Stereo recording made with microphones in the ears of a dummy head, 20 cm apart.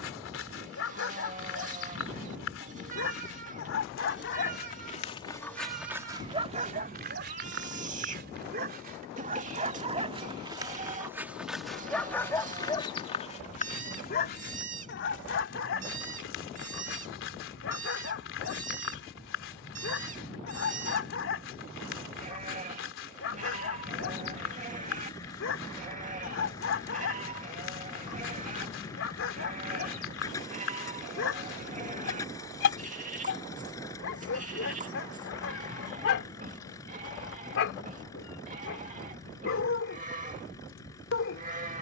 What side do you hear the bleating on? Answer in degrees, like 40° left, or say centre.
40° right.